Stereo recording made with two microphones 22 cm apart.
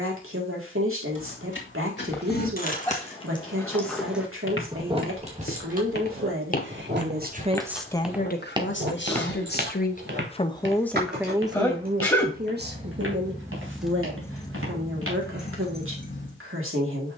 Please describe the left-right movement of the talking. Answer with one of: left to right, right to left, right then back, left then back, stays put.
left then back.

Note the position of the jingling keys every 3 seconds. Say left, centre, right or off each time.
left, centre, right, right, centre, left.